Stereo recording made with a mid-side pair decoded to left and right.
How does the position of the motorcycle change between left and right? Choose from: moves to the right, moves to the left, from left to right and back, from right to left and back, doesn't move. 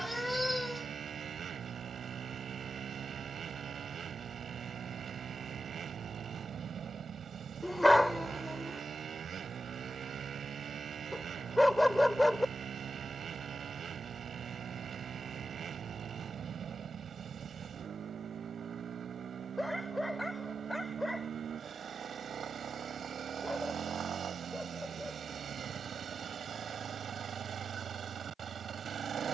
doesn't move.